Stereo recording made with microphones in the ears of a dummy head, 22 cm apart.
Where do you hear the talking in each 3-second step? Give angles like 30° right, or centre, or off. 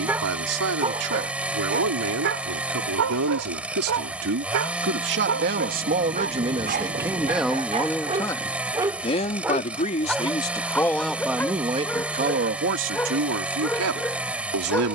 70° right, 50° right, 10° right, 10° left, 60° right.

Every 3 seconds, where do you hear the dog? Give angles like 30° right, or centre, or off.
40° right, 60° right, 30° right, centre, 10° left.